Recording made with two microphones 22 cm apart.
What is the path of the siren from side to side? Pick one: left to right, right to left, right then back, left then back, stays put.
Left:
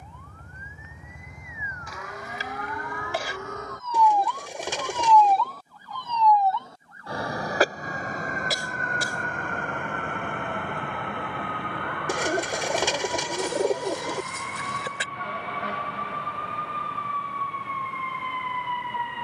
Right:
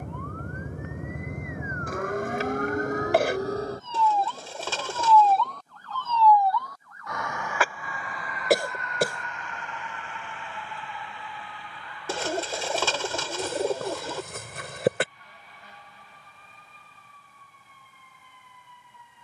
right to left.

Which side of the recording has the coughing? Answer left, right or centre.
right.